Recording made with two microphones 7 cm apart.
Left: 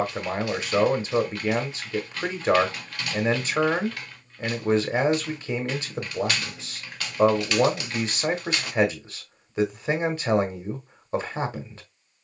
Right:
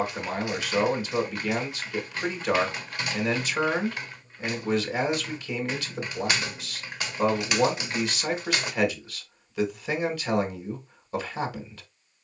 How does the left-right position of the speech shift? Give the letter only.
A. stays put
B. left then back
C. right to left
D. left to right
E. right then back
A.